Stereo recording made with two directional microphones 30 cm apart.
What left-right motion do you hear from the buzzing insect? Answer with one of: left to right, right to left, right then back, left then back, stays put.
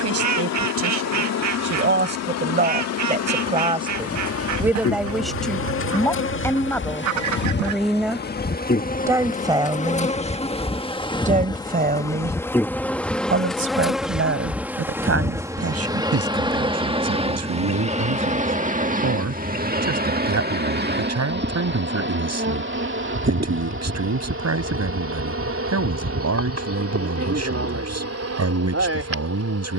left to right.